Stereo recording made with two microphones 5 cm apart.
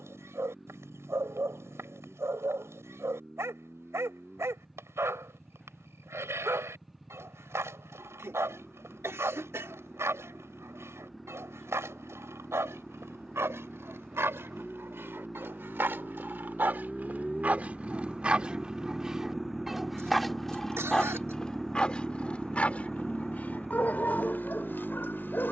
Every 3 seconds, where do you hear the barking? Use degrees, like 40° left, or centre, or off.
70° right, 70° right, 70° right, 70° right, 60° right, 40° right, 10° right, 30° left, 40° left.